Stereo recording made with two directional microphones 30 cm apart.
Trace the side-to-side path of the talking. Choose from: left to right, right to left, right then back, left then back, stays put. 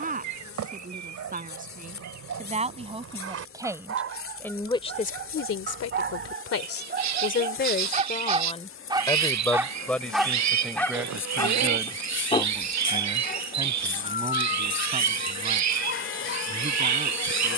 left then back.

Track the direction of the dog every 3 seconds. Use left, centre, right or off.
right, right, right, centre, left, left.